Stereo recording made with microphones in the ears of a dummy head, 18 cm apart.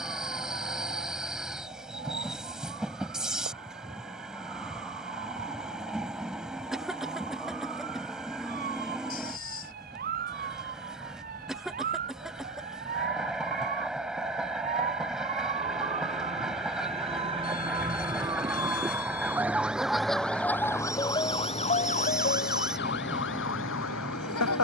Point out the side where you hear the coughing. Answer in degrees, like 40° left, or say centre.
centre.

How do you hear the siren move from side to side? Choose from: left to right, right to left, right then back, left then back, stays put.
right to left.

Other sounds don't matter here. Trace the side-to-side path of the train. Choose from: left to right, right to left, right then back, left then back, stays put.
stays put.